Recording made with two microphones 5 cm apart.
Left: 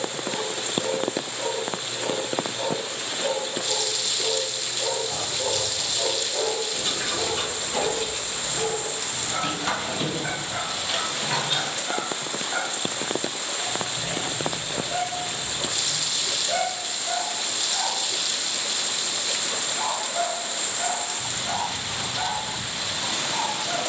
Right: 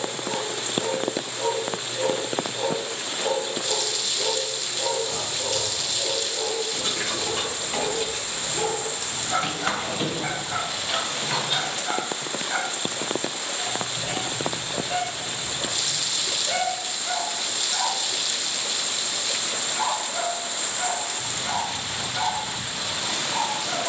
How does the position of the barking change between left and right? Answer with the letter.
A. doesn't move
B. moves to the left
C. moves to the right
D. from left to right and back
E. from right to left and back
E.